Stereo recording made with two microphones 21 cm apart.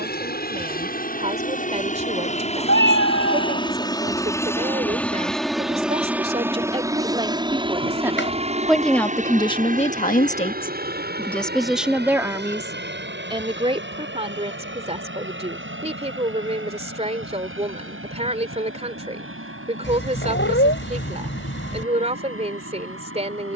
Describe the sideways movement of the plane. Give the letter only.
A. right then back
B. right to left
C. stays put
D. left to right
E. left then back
D.